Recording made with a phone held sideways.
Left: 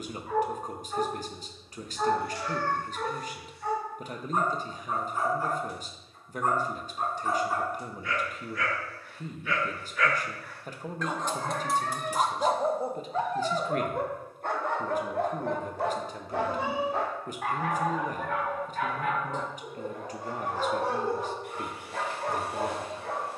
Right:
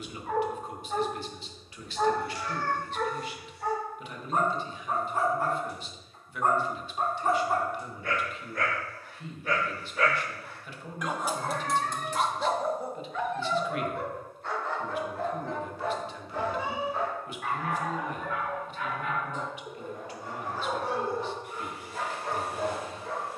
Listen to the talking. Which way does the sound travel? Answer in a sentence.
You can hear the talking stay in one place.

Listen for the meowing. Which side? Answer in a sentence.
In this clip you hear the meowing on the left.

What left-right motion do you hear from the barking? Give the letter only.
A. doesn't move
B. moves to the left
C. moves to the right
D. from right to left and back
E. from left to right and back
B.